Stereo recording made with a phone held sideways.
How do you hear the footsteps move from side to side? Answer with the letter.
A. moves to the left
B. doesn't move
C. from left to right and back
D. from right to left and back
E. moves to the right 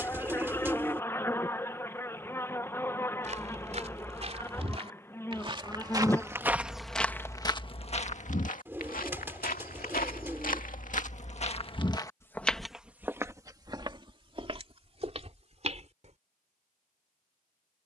D.